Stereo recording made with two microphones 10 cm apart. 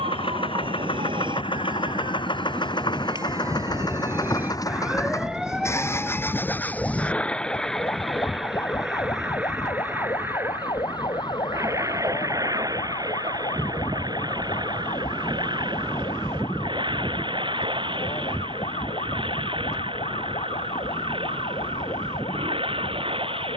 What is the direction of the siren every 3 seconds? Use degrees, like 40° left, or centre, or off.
50° right, 20° right, 20° left, 40° left, 50° left, 60° left, 60° left, 60° left.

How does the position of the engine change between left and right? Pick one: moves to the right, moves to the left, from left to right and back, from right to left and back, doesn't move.
moves to the right.